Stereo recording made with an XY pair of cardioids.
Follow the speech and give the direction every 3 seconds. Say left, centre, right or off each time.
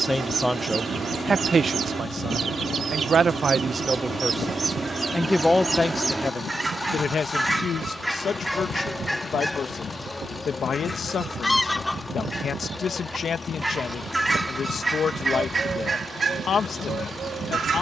right, centre, left, left, left, left.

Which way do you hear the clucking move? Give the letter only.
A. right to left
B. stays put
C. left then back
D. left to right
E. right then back
C.